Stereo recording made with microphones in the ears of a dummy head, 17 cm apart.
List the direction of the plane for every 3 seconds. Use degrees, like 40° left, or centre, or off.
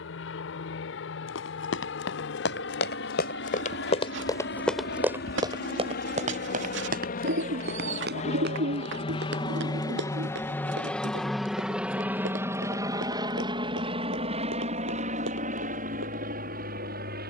70° left, 60° left, 40° left, 10° left, 20° right, 40° right.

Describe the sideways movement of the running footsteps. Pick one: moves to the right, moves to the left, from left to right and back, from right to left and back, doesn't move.
moves to the right.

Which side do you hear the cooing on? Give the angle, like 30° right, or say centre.
70° right.